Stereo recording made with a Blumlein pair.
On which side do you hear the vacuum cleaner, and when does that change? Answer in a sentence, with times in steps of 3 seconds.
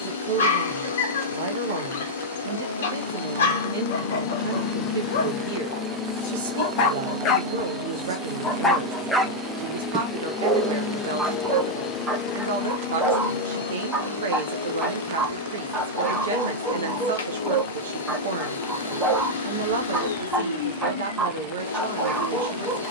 You can hear the vacuum cleaner on the left from 0 s, in the centre from 6 s and on the left from 12 s.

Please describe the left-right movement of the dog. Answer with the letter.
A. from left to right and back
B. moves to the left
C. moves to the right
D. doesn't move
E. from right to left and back
C.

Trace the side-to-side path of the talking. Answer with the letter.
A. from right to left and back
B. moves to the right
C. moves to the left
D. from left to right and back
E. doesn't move
E.